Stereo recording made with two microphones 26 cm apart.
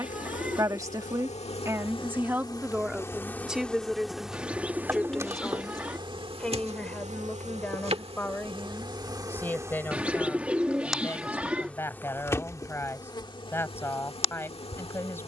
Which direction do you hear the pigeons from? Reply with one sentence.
In this clip you hear the pigeons in the centre.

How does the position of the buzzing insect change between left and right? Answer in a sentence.
In this clip you hear the buzzing insect move from left to right and back again.